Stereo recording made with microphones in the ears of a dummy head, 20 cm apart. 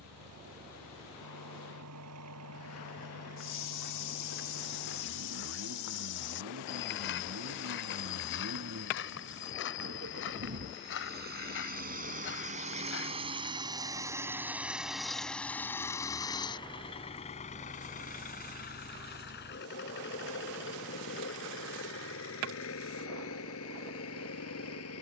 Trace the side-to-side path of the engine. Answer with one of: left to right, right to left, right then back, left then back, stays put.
right to left.